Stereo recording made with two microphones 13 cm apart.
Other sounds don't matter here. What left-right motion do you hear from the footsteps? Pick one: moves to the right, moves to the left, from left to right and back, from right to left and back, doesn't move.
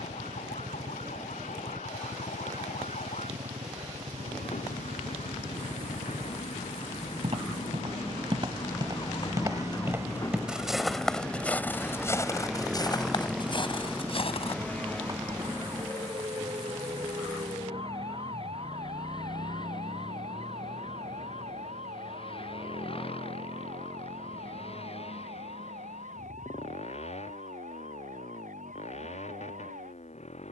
moves to the left.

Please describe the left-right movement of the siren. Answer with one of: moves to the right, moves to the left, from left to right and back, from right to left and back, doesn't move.
moves to the right.